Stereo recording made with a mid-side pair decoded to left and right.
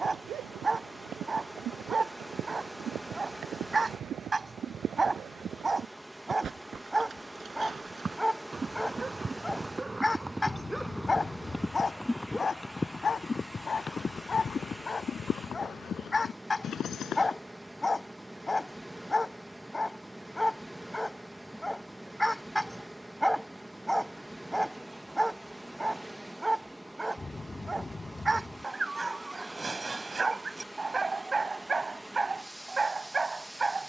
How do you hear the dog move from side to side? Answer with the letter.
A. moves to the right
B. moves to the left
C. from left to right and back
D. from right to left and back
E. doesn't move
D.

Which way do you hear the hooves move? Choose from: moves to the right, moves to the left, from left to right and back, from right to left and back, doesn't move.
moves to the left.